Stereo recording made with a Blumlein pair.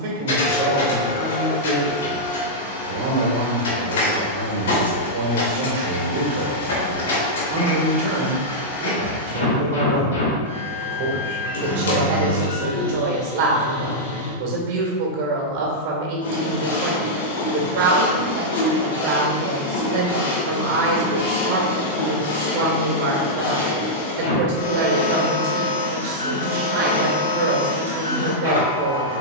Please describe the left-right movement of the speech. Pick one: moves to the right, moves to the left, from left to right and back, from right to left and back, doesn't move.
doesn't move.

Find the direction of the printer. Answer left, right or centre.
left.